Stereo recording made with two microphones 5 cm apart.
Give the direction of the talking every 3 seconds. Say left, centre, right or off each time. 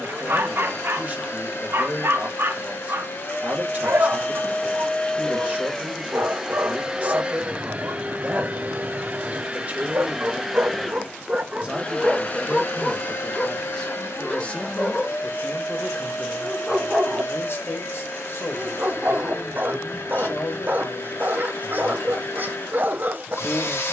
right, right, right, right, centre, left, left, left.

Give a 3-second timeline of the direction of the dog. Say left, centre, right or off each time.
right, right, right, right, centre, centre, right, right.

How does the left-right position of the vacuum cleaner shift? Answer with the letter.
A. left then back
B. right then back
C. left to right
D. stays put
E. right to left
B.